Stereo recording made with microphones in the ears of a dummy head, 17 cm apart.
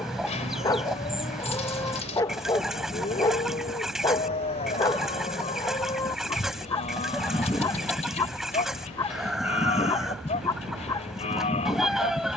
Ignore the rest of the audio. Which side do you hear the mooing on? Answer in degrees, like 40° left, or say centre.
40° left.